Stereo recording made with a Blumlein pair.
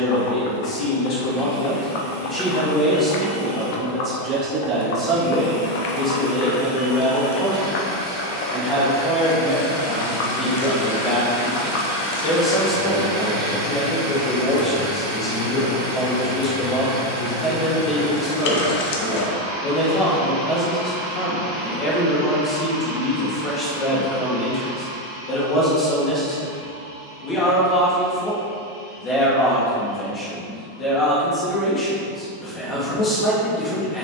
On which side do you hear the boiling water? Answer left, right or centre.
left.